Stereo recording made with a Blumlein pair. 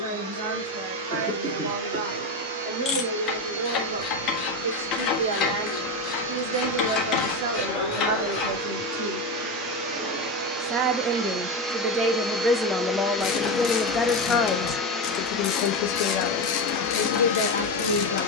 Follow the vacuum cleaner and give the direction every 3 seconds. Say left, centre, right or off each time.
right, right, right, right, centre, left.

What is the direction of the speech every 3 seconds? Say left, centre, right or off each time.
right, right, right, right, centre, left.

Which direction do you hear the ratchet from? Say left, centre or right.
left.